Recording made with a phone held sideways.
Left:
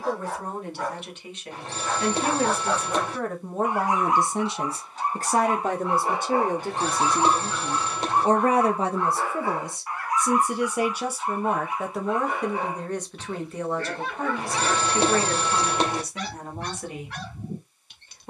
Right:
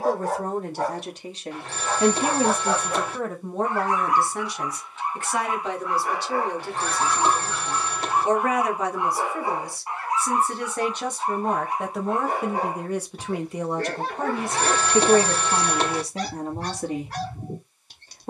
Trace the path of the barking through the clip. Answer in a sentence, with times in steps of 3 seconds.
You can hear the barking on the right from 0 s, on the left from 3 s, in the centre from 6 s and on the right from 9 s.